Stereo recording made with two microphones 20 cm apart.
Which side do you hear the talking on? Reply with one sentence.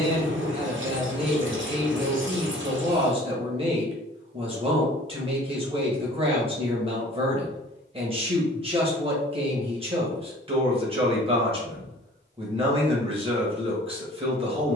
You can hear the talking on the right.